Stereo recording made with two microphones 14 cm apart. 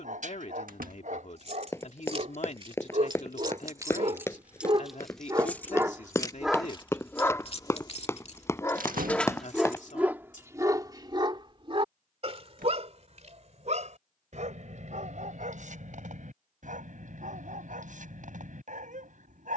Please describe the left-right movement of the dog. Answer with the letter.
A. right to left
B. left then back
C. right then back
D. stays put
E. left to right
B.